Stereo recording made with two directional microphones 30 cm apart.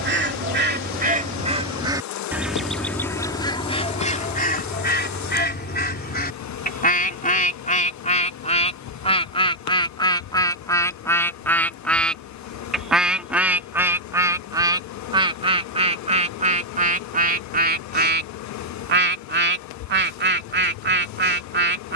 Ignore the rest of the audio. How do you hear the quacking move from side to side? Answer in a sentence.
You can hear the quacking go left and come back.